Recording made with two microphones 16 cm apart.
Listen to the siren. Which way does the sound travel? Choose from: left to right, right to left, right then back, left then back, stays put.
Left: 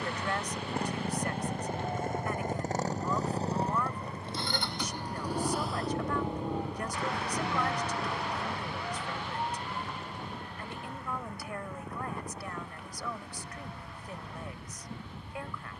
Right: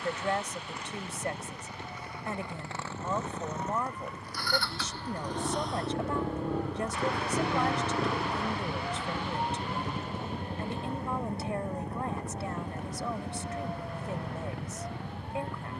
left to right.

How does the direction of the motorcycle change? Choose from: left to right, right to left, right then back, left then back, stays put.
left to right.